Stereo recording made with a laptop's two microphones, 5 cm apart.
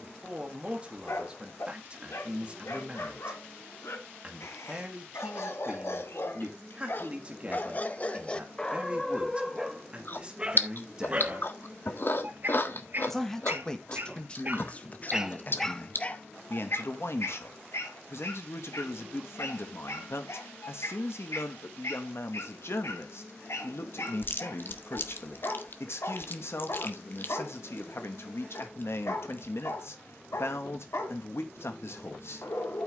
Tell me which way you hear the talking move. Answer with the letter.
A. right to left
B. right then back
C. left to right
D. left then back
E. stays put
A.